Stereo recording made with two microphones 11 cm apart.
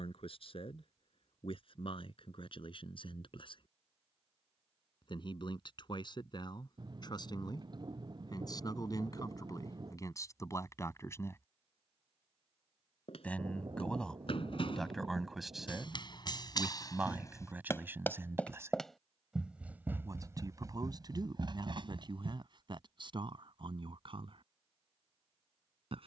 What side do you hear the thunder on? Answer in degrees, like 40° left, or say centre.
40° right.